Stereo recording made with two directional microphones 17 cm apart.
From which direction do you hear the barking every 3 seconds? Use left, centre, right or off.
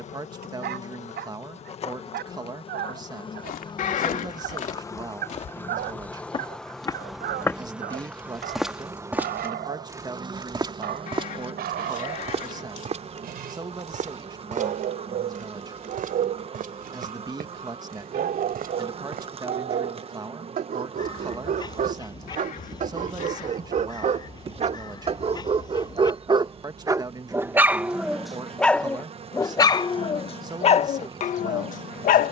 right, right, right, right, right, right, right, right, right, centre, left.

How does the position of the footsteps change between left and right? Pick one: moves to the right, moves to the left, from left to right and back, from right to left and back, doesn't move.
moves to the right.